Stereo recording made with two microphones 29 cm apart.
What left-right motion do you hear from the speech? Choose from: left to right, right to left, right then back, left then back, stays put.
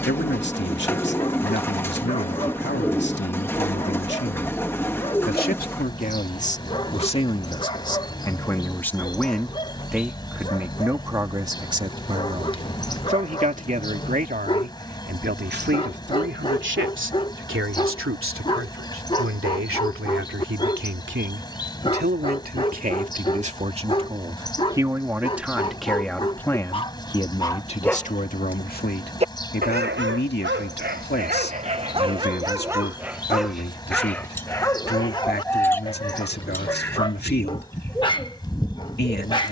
right then back.